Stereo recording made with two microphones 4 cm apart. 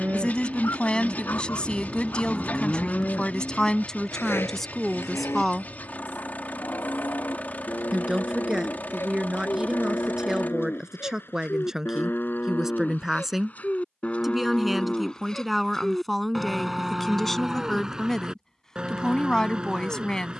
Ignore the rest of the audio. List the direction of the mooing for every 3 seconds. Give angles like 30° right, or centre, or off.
centre, 70° left, 70° left, 60° left, 40° left, centre, 20° right.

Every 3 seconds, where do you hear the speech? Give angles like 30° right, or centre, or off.
20° left, 10° left, 10° right, 10° right, 10° right, centre, 10° left.